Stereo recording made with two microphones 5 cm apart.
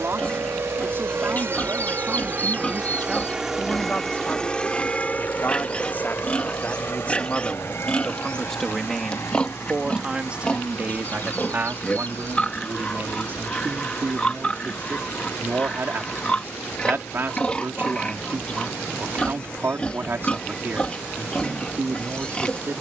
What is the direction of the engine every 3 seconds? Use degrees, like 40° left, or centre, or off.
50° right, 20° left, 60° left, 70° left, 70° left, 70° left, 80° left, 80° left.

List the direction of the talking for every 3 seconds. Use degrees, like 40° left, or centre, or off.
40° right, 30° left, 20° left, 30° right, 50° right, 50° right, 50° right, 50° right.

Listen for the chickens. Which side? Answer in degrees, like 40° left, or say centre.
40° left.